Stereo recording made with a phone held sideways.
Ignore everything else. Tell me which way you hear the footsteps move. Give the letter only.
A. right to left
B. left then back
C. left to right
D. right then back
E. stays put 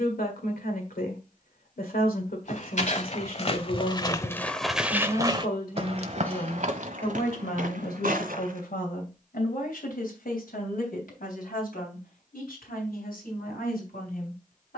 C.